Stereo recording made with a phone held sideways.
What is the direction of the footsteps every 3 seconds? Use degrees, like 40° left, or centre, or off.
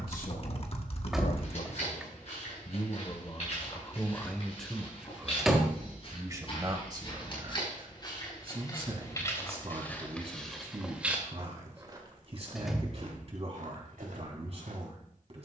50° left, 50° left, 40° left, centre, 60° right.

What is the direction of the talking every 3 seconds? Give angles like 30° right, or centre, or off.
60° left, 10° left, 30° right, 40° right, 40° right.